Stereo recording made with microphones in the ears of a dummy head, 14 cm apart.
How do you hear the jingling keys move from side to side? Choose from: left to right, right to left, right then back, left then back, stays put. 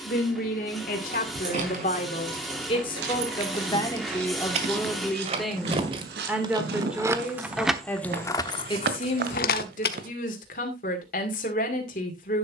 right to left.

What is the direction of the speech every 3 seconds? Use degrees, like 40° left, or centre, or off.
50° left, 10° left, 10° left, 50° left.